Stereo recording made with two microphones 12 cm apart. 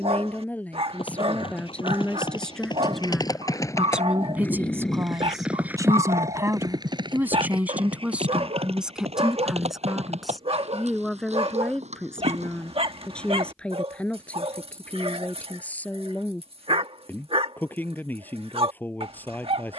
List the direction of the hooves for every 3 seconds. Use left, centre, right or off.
left, centre, right, right, right, off, off.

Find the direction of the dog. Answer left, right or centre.
right.